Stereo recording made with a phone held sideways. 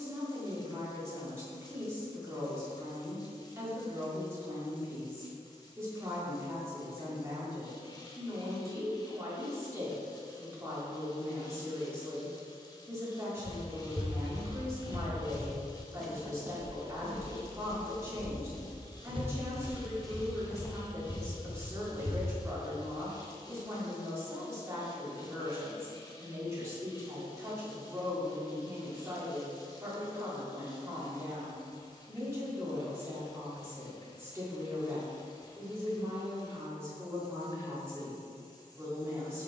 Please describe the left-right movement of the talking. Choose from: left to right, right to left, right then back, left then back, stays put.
stays put.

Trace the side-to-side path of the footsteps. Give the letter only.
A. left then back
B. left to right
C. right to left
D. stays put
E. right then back
E.